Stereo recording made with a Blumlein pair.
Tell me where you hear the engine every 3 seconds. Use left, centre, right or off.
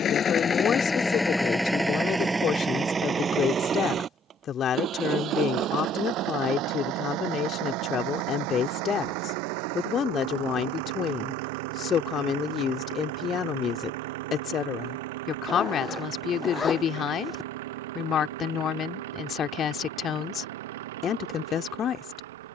centre, right, right, right, right, right, right, right.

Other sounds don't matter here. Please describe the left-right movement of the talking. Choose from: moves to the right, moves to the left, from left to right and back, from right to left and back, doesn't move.
doesn't move.